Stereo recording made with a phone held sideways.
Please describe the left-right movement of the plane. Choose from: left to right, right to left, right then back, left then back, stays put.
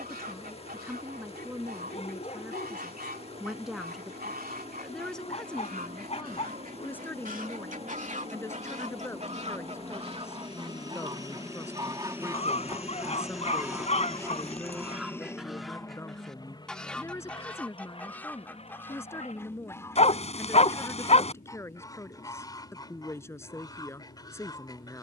right to left.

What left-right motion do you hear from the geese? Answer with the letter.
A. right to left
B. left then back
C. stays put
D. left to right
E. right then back
A.